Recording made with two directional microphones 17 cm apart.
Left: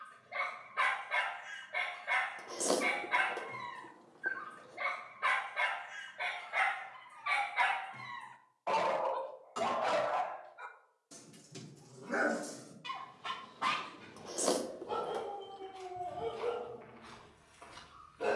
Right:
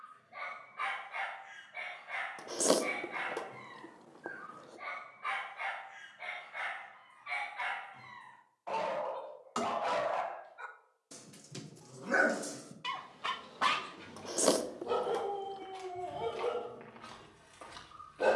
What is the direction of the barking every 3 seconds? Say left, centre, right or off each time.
left, left, left, centre, right, right.